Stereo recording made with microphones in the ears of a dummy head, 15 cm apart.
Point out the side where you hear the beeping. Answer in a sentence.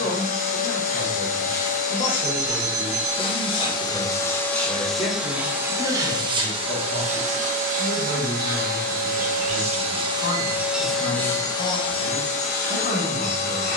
You can hear the beeping on the right.